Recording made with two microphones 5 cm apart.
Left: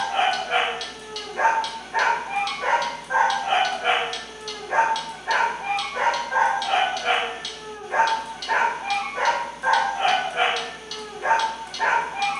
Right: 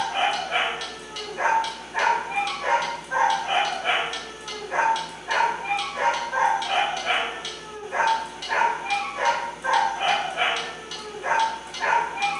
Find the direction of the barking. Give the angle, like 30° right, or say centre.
70° left.